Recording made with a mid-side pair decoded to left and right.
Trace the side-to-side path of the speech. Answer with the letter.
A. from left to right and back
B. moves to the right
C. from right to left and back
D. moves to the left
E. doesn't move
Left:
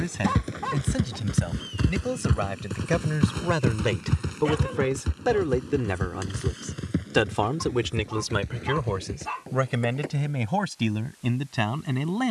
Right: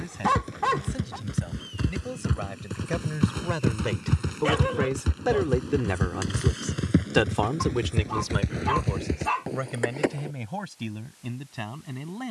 A.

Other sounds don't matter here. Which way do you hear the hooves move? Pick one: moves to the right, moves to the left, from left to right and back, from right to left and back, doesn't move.
moves to the right.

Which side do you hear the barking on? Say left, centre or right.
right.